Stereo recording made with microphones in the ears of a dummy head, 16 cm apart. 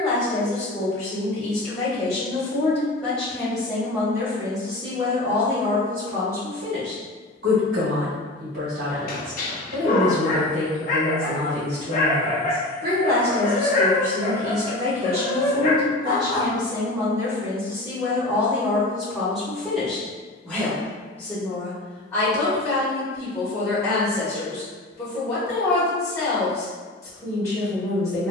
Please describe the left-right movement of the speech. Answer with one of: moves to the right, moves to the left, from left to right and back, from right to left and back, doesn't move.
from left to right and back.